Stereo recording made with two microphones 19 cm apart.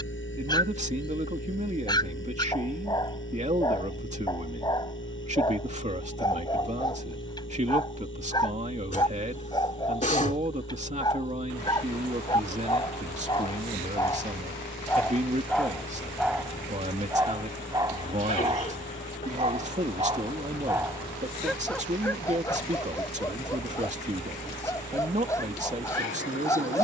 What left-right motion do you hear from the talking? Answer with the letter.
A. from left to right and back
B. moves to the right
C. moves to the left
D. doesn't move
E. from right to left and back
D.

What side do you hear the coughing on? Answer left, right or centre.
left.